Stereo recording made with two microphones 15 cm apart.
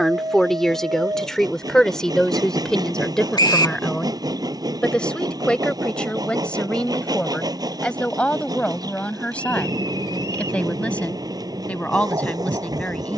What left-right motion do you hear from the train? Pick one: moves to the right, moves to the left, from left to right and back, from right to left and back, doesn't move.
doesn't move.